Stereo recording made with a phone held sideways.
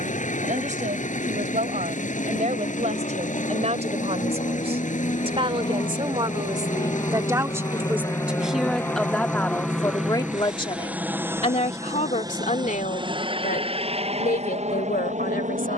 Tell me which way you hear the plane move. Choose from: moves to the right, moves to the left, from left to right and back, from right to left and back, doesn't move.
moves to the right.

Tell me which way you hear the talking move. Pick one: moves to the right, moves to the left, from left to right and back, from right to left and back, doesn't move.
moves to the left.